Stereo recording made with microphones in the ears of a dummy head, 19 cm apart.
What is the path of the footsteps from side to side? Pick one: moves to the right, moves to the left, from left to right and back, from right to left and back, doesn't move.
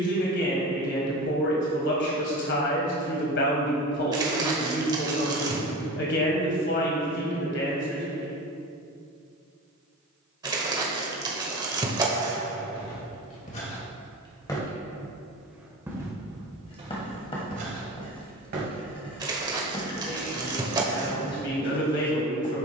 moves to the right.